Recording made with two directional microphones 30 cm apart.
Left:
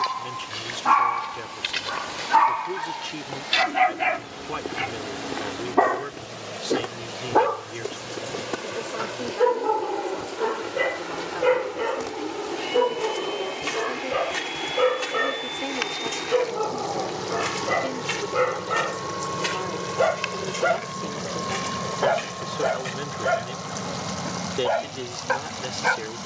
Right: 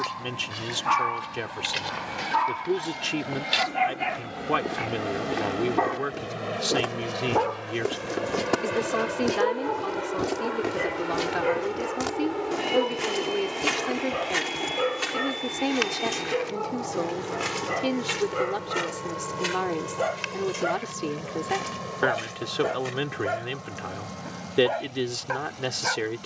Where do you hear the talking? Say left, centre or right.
right.